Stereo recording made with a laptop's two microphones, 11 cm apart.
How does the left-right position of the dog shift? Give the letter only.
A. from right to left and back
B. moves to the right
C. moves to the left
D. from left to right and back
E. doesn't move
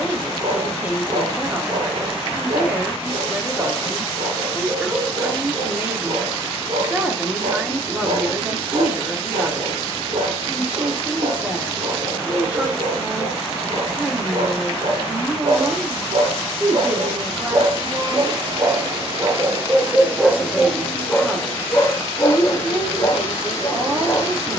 C.